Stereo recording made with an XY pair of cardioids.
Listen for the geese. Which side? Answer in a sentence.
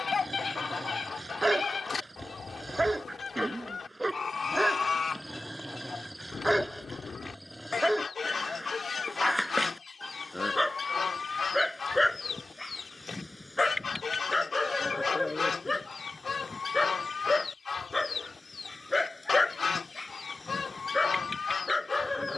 In this clip you hear the geese on the left.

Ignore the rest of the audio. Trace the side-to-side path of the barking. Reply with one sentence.
In this clip you hear the barking move to the left.